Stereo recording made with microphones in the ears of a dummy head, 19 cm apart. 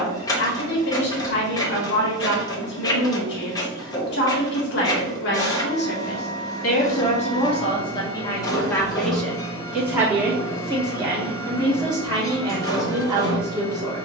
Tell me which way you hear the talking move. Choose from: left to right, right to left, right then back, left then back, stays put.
left to right.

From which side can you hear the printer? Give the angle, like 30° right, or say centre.
20° left.